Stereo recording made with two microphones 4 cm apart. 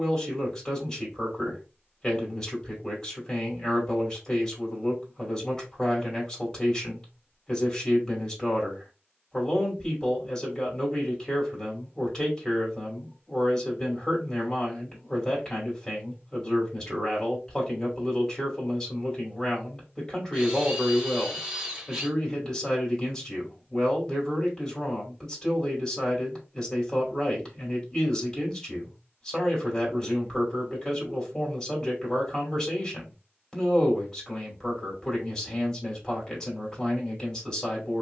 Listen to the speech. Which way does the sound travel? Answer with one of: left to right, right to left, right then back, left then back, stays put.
stays put.